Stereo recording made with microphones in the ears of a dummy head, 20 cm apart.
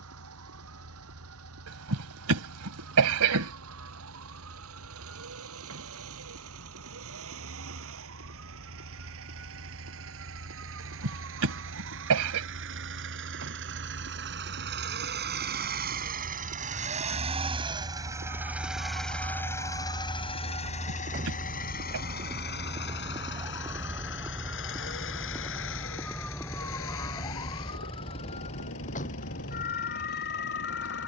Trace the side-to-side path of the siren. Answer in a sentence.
You can hear the siren go from the right side to the left.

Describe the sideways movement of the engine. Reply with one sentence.
In this clip you hear the engine move to the left.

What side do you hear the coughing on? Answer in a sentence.
In this clip you hear the coughing on the right.